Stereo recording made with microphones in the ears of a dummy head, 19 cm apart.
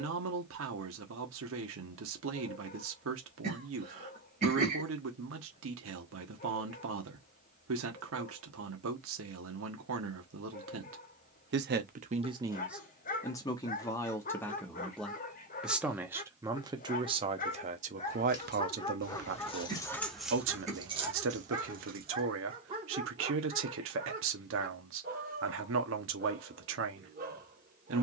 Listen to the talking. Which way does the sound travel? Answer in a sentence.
In this clip you hear the talking move from right to left and back again.